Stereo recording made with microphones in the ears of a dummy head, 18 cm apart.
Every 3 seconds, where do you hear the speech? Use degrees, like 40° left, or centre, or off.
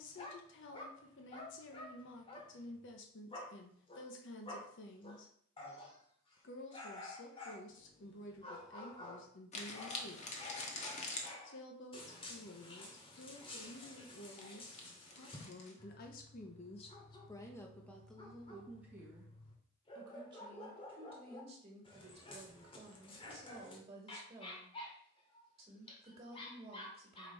60° left, 60° left, 60° left, 60° left, 60° left, 30° left, 10° right, 30° right, 30° right.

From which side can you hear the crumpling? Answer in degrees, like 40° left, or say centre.
30° left.